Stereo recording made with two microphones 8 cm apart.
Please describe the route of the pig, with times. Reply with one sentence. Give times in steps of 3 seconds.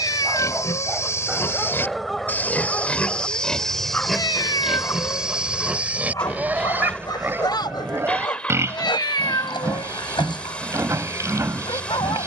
In this clip you hear the pig on the left from 0 s, in the centre from 3 s and on the right from 6 s.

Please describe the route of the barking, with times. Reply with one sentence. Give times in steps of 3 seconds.
In this clip you hear the barking in the centre from 0 s and on the left from 3 s.